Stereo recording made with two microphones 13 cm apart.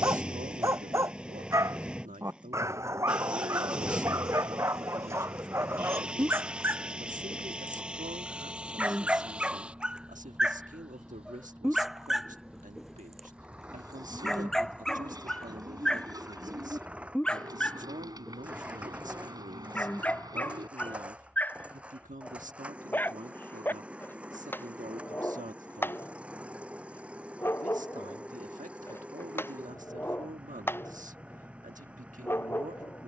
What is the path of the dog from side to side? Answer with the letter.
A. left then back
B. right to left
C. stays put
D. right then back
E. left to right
B.